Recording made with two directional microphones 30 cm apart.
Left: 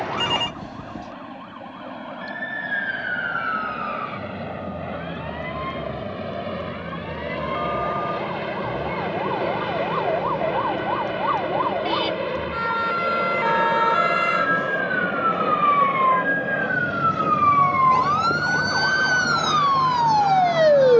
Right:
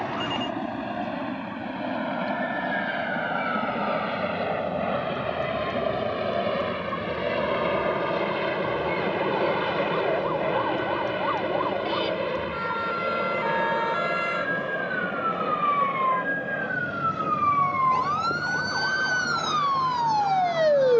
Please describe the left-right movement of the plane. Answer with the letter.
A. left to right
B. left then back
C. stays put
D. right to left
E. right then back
D.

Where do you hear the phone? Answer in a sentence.
You can hear the phone on the left.